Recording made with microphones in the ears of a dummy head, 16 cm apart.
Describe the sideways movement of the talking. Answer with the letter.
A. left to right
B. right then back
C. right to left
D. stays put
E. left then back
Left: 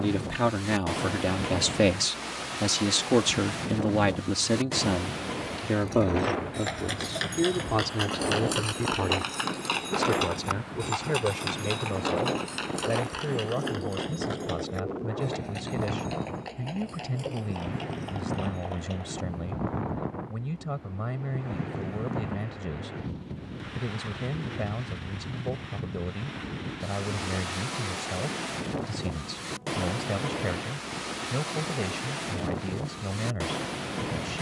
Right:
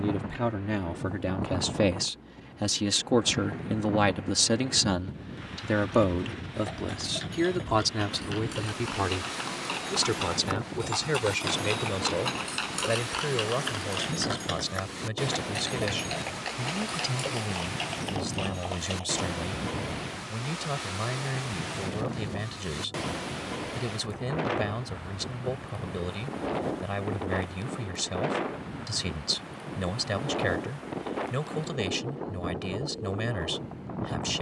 A.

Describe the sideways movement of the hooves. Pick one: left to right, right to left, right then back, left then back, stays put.
left to right.